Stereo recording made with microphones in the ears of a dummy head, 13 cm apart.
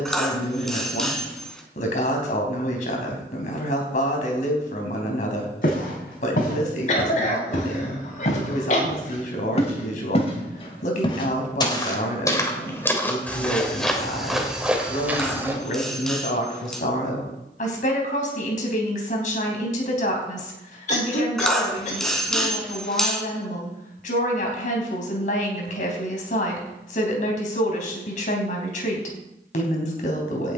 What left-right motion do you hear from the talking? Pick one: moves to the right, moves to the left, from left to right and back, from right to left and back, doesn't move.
doesn't move.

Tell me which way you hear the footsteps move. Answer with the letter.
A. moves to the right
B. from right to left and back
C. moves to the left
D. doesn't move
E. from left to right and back
A.